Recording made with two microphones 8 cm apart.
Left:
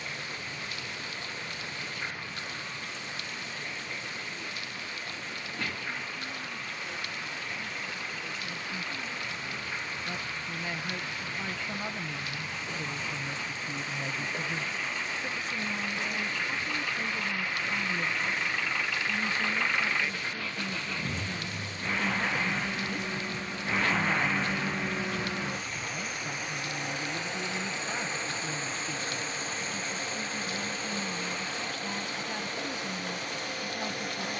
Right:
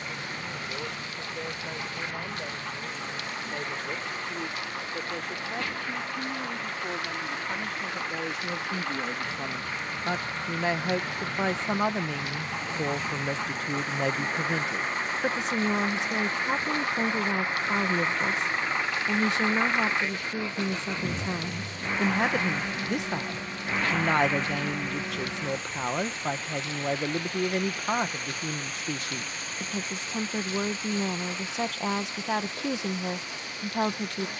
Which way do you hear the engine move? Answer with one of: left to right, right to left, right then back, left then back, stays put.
right to left.